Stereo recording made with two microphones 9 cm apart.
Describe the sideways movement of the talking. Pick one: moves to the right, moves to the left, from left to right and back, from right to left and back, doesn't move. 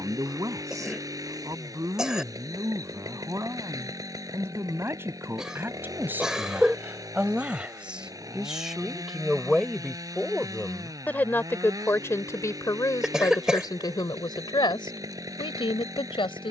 moves to the left.